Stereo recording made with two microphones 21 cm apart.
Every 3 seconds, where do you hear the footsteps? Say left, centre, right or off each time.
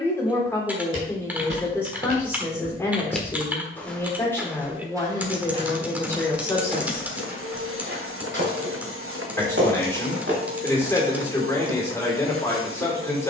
right, centre, right, right, off.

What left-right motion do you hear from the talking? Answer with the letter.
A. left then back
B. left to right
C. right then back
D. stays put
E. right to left
D.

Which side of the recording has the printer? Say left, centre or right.
right.